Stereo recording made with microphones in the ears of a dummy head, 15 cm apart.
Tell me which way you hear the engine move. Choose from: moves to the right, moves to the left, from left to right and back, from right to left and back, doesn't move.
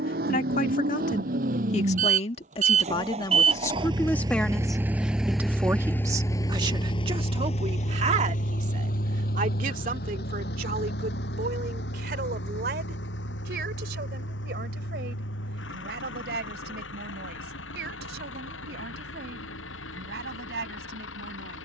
moves to the left.